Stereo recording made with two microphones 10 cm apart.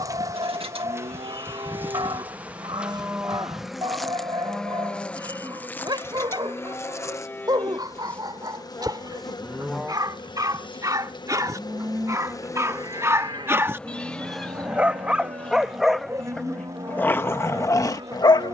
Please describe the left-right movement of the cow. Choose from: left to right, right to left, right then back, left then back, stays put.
left then back.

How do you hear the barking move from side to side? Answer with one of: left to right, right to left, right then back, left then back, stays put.
right to left.